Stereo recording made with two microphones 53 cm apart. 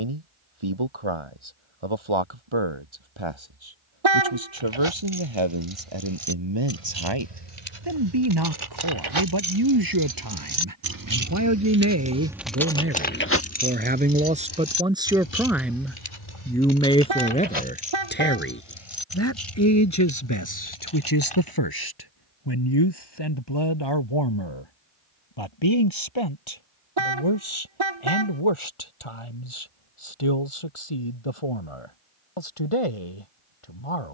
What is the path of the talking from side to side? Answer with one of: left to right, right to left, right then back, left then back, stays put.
right to left.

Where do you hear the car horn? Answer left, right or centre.
right.